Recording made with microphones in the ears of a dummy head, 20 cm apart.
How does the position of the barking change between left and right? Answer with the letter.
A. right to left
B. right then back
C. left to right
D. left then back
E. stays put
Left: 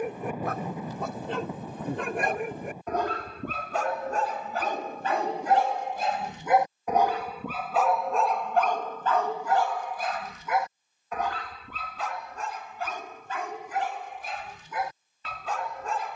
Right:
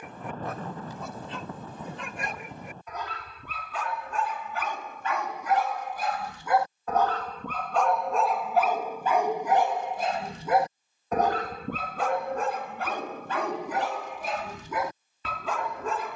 C.